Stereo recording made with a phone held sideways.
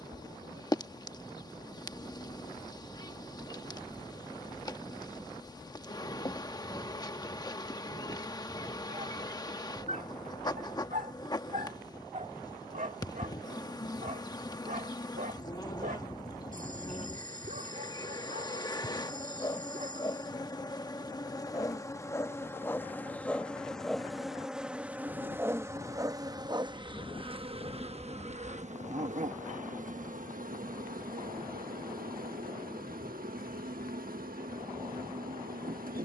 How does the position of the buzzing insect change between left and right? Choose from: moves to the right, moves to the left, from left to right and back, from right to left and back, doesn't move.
moves to the right.